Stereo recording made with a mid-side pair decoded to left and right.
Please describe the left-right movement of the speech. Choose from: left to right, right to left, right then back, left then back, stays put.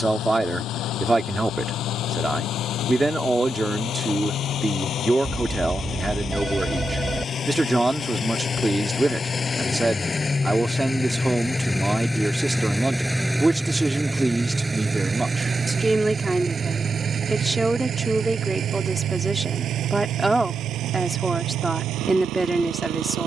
stays put.